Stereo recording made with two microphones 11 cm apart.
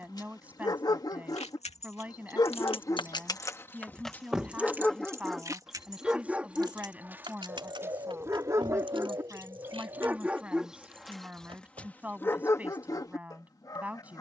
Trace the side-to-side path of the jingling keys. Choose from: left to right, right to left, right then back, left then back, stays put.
left to right.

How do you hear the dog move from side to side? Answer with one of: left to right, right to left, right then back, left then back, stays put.
right then back.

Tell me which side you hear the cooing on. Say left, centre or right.
right.